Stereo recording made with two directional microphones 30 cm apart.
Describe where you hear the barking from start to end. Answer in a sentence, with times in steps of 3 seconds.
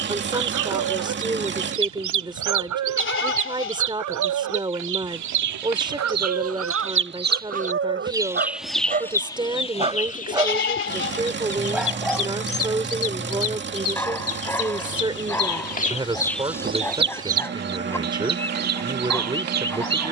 In this clip you hear the barking on the right from 0 s and in the centre from 9 s.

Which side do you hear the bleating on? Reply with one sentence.
In this clip you hear the bleating on the left.